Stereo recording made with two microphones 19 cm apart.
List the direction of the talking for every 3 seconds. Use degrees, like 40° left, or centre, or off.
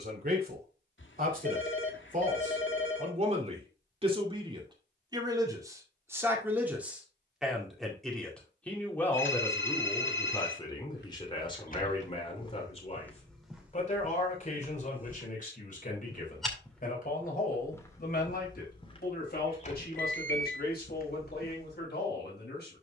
50° right, 30° right, centre, 20° left, 30° left, 40° left, 50° left, 50° left.